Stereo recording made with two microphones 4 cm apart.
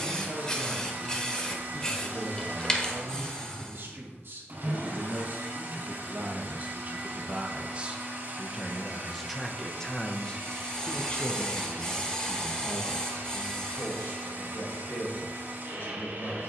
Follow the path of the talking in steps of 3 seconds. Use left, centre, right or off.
right, right, right, left, left, left.